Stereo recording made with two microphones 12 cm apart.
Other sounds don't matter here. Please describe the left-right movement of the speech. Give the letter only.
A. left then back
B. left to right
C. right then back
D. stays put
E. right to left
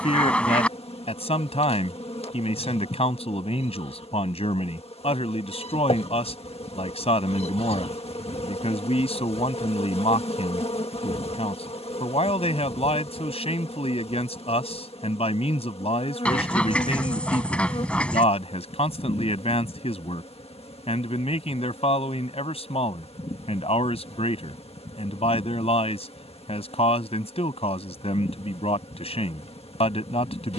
D.